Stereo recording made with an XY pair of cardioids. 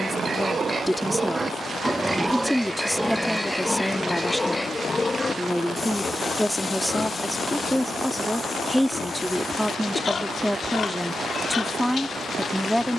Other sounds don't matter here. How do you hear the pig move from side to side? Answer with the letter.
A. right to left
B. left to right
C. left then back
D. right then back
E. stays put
A.